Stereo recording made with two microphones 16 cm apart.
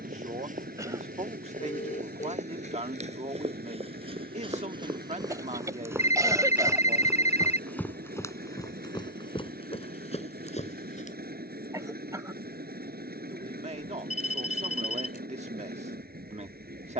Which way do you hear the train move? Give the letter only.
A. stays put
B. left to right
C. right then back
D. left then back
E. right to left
A.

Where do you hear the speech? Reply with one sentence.
In this clip you hear the speech on the right.